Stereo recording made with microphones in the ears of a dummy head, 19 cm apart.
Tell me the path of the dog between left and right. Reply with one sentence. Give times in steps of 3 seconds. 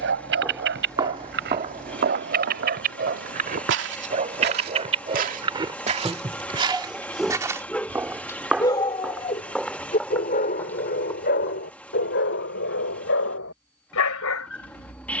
You can hear the dog on the right from 0 s, in the centre from 6 s and on the left from 9 s.